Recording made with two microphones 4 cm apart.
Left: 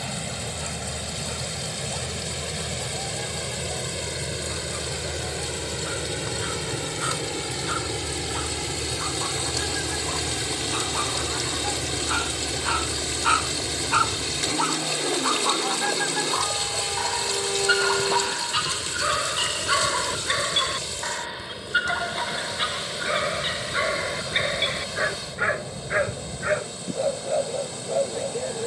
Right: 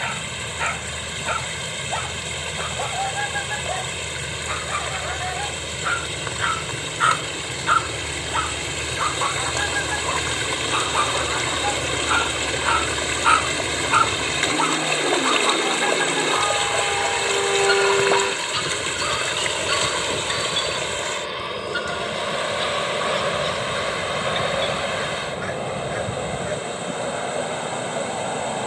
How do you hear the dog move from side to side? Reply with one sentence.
In this clip you hear the dog move to the left.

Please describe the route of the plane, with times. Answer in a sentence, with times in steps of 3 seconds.
You can hear the plane on the left from 0 s, in the centre from 9 s and on the right from 15 s.